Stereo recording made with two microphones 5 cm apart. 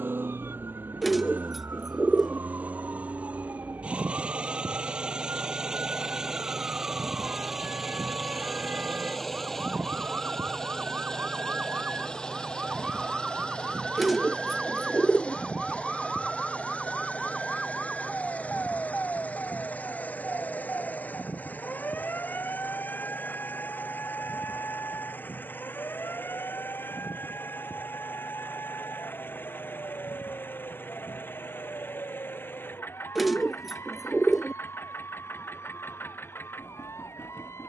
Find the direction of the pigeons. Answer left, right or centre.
centre.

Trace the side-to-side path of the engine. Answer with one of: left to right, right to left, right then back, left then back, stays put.
right to left.